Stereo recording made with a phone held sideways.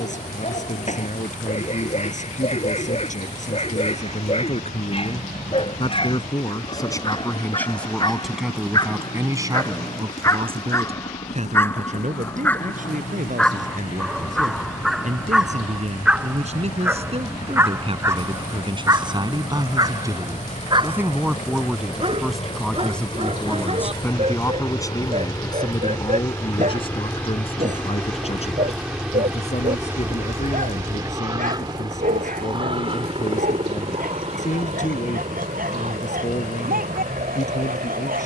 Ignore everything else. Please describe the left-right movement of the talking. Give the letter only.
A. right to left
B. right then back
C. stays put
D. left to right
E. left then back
B.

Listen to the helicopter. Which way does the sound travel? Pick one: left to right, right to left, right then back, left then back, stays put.
left to right.